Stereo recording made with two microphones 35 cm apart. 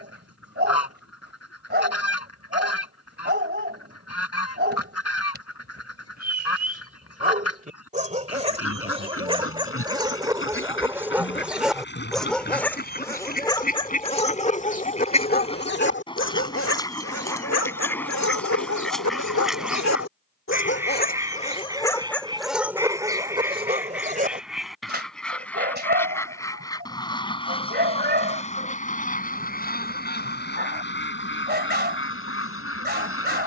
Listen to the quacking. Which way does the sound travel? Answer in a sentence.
You can hear the quacking move from left to right and back again.